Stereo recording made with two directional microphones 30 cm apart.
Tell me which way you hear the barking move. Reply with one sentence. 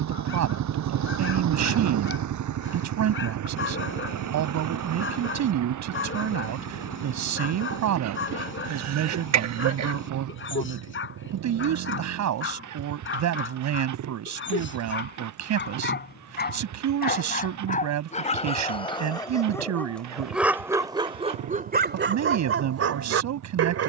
In this clip you hear the barking move from left to right.